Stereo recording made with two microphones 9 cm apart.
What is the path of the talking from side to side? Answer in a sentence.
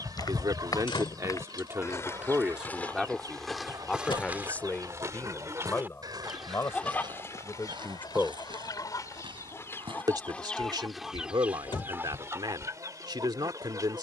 In this clip you hear the talking move from right to left and back again.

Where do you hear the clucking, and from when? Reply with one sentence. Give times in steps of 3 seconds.
You can hear the clucking on the right from 0 s, on the left from 6 s, in the centre from 9 s and on the right from 12 s.